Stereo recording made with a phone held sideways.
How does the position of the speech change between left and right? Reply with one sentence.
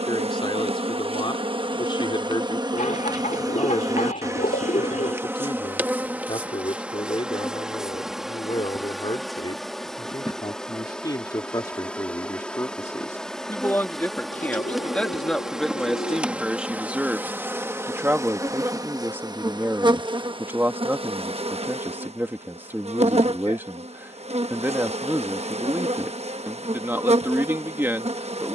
You can hear the speech travel towards the right.